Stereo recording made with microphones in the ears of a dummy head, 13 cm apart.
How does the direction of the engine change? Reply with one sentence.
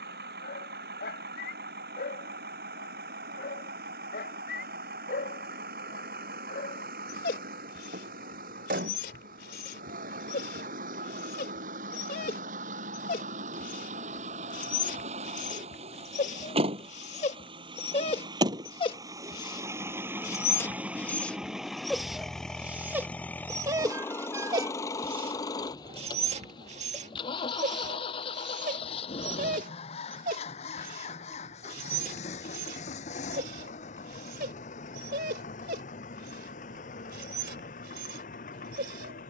You can hear the engine travel towards the left.